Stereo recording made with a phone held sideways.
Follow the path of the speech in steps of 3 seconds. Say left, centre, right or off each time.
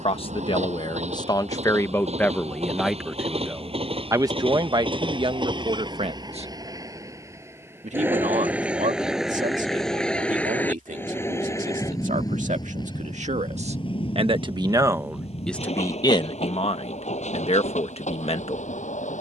left, right, right, right, right, left, left.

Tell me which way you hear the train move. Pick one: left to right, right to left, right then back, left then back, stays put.
right to left.